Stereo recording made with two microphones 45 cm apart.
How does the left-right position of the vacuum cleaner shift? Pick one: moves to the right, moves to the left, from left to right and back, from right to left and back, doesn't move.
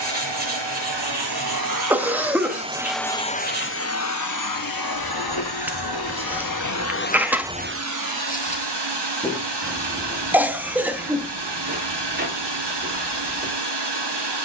from right to left and back.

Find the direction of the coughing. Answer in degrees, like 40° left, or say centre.
centre.